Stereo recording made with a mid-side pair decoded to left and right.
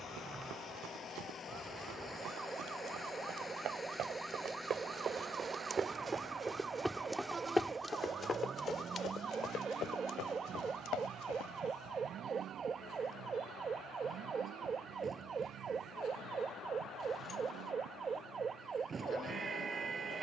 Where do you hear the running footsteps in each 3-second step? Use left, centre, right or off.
right, right, centre, left, off, off, off.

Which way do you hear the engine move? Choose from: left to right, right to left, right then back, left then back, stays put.
left to right.